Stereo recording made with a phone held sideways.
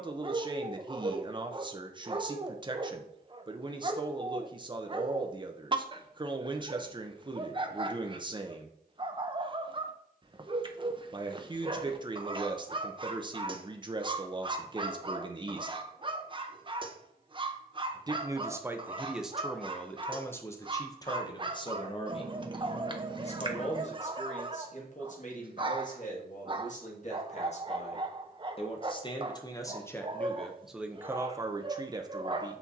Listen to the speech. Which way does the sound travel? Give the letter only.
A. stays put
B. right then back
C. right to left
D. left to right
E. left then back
E.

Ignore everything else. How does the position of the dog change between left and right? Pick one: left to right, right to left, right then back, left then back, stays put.
stays put.